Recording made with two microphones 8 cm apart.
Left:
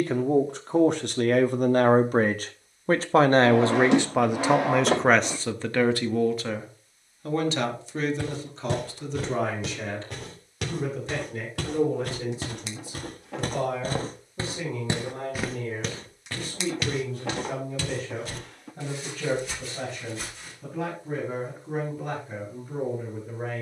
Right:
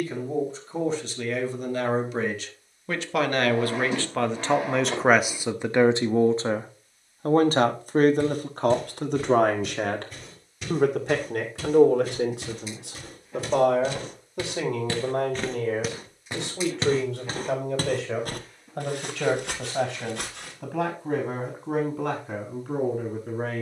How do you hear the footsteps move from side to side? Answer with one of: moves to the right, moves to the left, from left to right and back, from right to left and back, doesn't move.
moves to the right.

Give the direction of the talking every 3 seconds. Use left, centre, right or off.
left, centre, right, right, right, right, right, right.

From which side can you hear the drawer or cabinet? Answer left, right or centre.
left.